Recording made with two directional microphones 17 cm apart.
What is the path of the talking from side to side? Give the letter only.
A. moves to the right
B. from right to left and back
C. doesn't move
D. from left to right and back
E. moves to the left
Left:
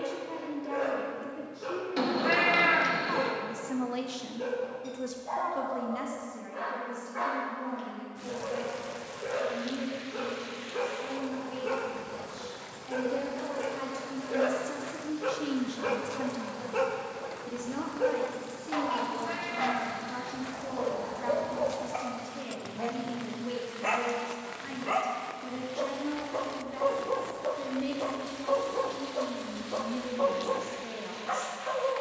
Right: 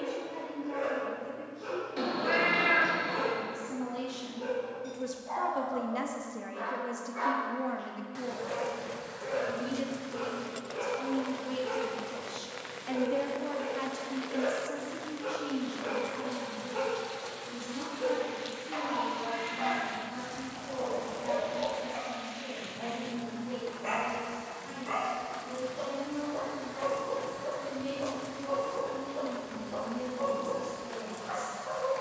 D.